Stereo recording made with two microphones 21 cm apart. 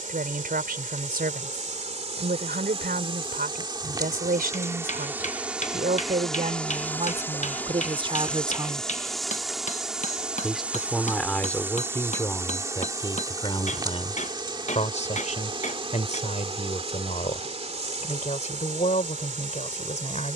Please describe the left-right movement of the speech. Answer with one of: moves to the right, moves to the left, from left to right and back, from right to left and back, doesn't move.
moves to the left.